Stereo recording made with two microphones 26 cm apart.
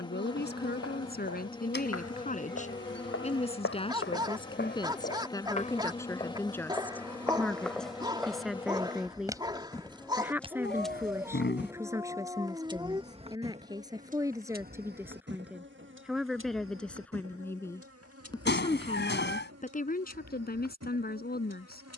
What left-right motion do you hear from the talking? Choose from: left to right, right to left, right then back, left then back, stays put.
right then back.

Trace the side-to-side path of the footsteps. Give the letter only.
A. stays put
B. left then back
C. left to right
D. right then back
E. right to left
C.